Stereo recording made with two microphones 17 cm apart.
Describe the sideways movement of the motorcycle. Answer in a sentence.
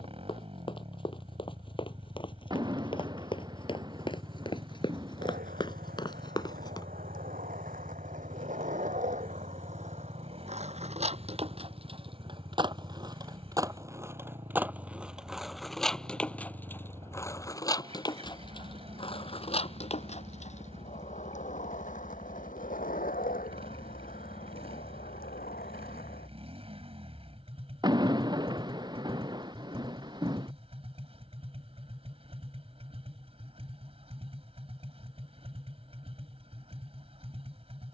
You can hear the motorcycle stay in one place.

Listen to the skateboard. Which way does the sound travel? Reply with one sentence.
You can hear the skateboard move from right to left.